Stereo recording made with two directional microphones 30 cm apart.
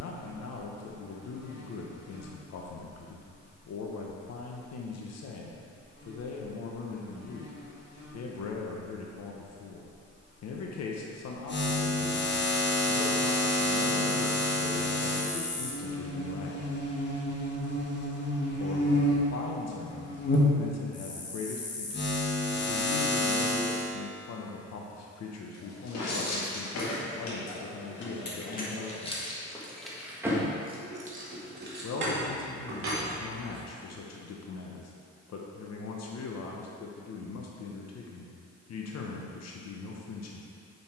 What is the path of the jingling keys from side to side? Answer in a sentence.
In this clip you hear the jingling keys move from left to right.